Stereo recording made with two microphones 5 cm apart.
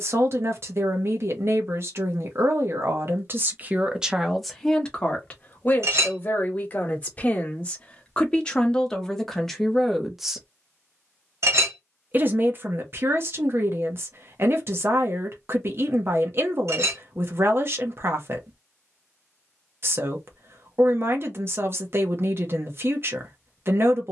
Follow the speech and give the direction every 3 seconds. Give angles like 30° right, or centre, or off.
50° right, centre, 20° left, centre, 50° right, 50° right, 50° right, 50° right.